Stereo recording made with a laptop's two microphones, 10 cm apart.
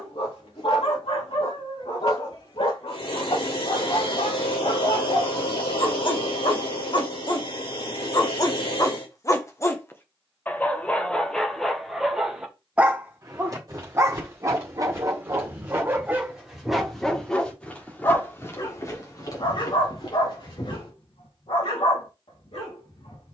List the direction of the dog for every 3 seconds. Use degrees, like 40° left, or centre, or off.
70° left, 60° left, 50° left, 10° left, 20° right, 10° right, 50° left, 70° left.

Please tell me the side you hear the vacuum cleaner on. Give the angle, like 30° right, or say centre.
80° left.